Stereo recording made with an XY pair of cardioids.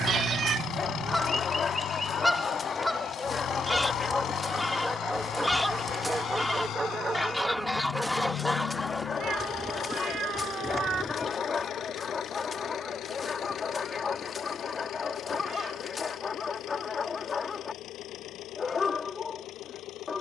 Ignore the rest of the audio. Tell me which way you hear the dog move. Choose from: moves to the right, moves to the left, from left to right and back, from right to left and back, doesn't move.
from left to right and back.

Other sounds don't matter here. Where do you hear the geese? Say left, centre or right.
centre.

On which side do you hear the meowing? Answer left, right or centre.
right.